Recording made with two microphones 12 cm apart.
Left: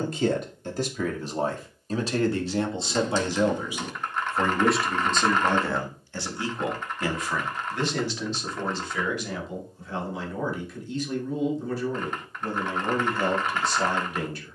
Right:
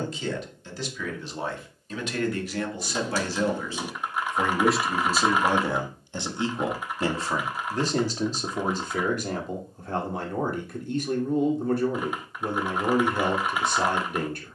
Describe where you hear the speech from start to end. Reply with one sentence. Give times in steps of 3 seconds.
In this clip you hear the speech on the left from 0 s, in the centre from 3 s and on the right from 6 s.